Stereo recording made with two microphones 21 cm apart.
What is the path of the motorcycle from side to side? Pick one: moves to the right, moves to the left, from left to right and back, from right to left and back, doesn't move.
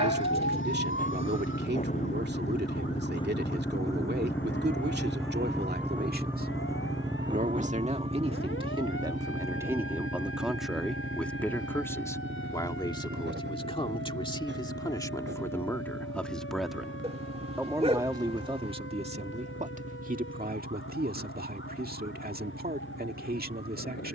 moves to the right.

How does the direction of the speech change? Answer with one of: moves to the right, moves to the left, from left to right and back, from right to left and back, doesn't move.
from right to left and back.